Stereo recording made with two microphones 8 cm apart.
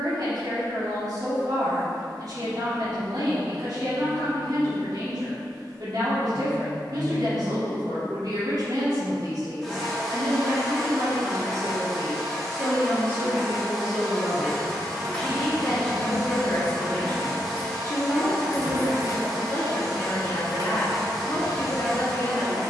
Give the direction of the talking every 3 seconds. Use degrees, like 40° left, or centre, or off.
60° right, 60° right, 60° right, 50° right, 20° right, 20° left, 40° left, 40° left.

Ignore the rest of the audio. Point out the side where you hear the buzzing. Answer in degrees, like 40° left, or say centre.
centre.